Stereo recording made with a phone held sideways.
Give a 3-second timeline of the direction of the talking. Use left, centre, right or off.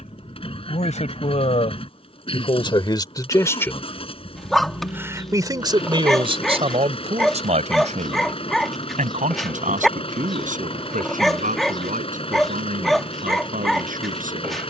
left, centre, right, right, right.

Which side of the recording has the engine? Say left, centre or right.
left.